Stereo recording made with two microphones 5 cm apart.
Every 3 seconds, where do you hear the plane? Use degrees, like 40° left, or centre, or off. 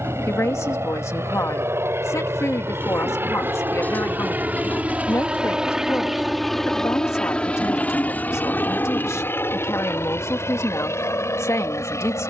60° right, 30° right, 20° left, 50° left.